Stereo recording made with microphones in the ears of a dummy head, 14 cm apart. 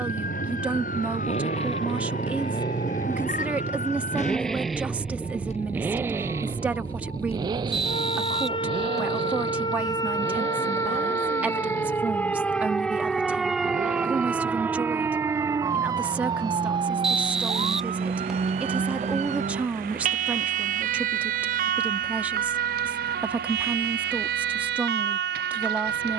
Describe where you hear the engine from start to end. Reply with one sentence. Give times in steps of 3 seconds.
In this clip you hear the engine on the left from 0 s, in the centre from 3 s and on the right from 6 s.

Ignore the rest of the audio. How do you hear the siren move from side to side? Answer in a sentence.
You can hear the siren travel towards the right.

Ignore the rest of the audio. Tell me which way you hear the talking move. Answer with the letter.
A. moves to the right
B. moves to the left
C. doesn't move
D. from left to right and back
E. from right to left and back
C.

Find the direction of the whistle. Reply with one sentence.
You can hear the whistle in the centre.